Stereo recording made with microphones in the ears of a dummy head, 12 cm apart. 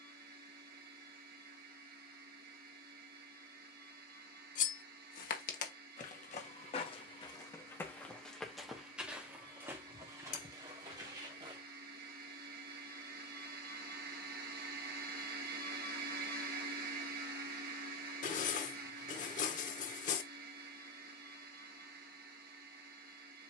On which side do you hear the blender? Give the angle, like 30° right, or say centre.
70° right.